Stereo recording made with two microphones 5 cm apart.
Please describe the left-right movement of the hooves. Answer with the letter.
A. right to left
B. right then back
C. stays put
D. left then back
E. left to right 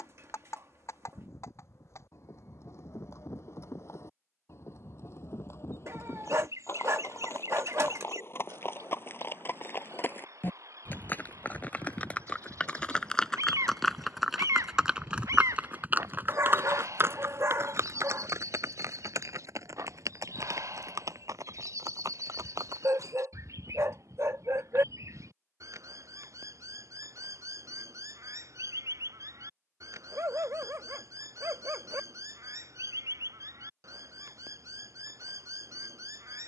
E.